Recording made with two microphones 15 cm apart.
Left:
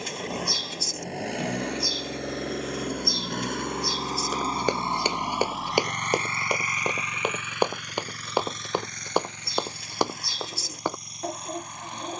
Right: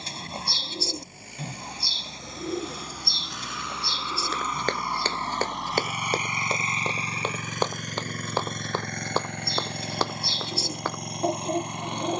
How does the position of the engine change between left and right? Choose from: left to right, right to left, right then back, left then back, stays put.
left to right.